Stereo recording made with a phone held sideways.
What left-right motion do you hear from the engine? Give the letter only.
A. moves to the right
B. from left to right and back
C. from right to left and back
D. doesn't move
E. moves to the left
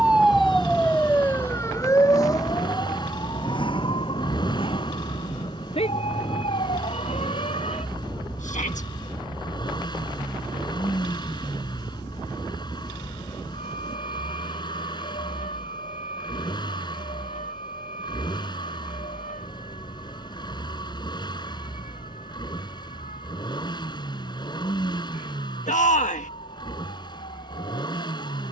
D.